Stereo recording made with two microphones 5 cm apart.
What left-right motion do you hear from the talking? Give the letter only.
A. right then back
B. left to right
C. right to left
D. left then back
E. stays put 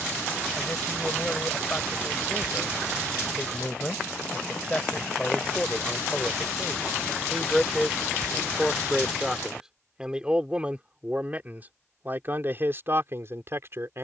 B.